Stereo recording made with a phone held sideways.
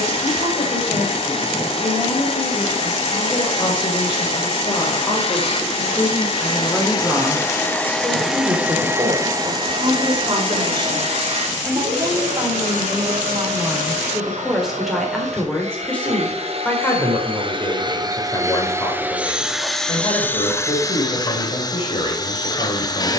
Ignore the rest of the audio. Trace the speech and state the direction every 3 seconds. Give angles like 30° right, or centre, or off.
40° left, 30° left, centre, 30° right, 10° right, 10° left, 30° left, 40° left.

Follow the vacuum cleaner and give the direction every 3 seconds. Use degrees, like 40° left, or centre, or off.
40° left, 40° left, 20° left, 40° right, 60° right, 50° right, centre, 30° left.